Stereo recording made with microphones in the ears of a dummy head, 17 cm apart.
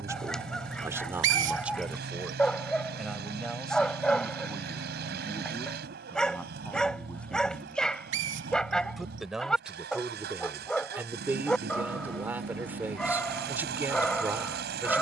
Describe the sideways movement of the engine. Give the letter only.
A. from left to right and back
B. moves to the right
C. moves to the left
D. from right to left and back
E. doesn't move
E.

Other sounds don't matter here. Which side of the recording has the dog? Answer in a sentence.
You can hear the dog in the centre.